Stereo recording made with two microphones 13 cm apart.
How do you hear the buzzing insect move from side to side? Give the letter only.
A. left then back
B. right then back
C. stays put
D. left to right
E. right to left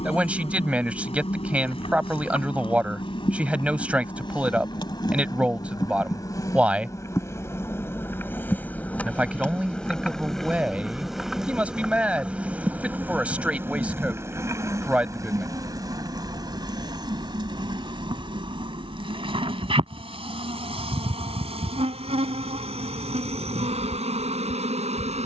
D.